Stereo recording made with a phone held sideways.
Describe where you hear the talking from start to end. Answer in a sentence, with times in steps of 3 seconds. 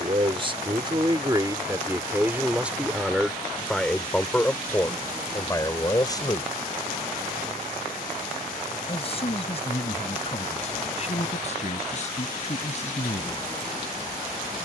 In this clip you hear the talking on the right from 0 s, in the centre from 3 s and on the left from 6 s.